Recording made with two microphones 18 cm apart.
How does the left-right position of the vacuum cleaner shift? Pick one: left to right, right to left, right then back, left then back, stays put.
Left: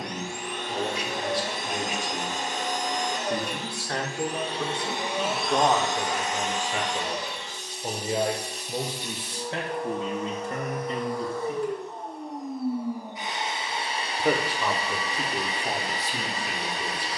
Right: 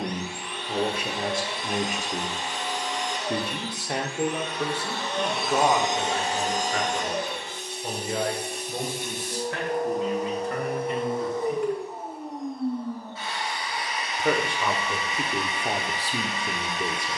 right then back.